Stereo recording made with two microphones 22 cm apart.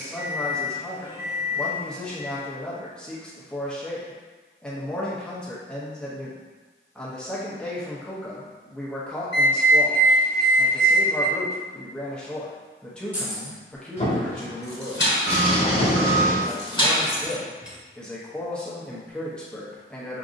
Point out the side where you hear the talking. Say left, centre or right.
centre.